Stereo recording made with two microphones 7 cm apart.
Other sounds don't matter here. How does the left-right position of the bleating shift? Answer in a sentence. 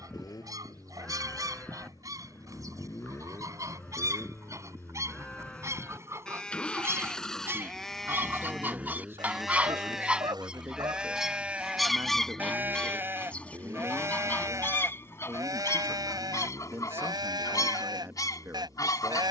In this clip you hear the bleating travel towards the right.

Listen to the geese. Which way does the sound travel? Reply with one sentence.
You can hear the geese travel towards the left.